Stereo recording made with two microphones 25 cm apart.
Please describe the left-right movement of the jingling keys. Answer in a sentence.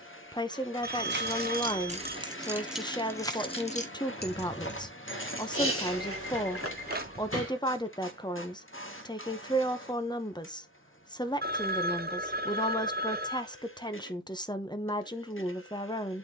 In this clip you hear the jingling keys go from the right side to the left.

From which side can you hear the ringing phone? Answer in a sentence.
In this clip you hear the ringing phone on the right.